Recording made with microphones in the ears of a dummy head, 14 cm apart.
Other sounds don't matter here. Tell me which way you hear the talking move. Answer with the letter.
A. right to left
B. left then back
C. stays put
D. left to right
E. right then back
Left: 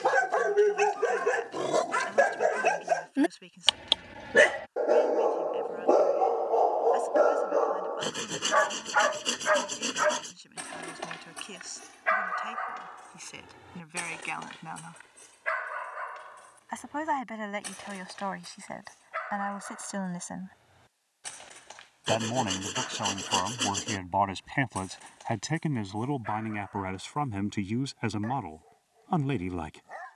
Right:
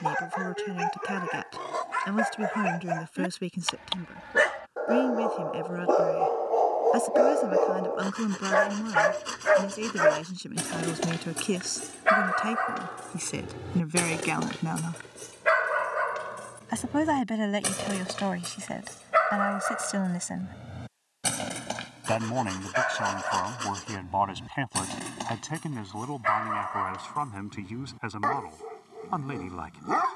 A.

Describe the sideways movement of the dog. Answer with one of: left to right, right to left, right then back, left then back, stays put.
left to right.